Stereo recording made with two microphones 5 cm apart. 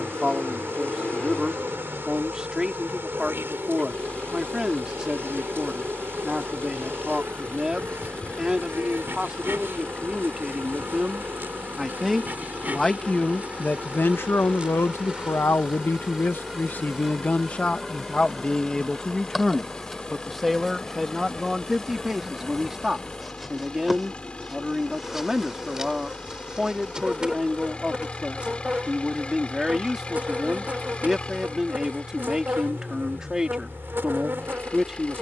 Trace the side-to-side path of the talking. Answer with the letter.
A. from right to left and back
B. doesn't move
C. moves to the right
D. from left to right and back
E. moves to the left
A.